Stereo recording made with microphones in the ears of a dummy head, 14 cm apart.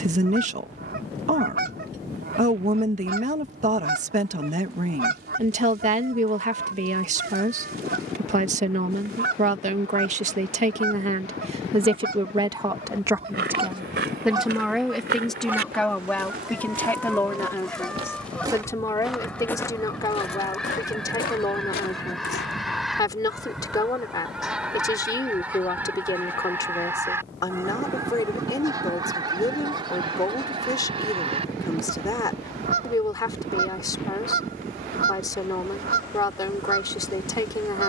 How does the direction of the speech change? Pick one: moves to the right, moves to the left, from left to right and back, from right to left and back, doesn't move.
moves to the left.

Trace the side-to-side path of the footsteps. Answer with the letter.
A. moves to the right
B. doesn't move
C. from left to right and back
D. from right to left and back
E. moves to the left
E.